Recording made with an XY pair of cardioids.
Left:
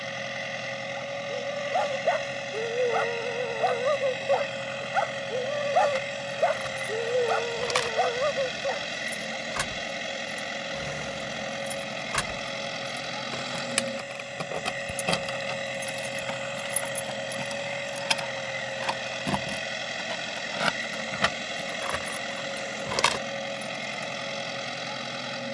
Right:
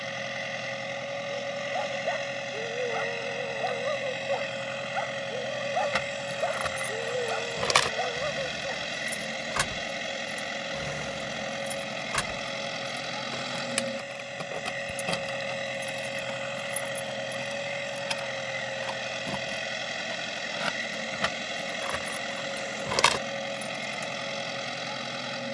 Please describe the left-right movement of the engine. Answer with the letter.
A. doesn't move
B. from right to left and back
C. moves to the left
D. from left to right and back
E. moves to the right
A.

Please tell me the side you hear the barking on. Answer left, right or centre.
left.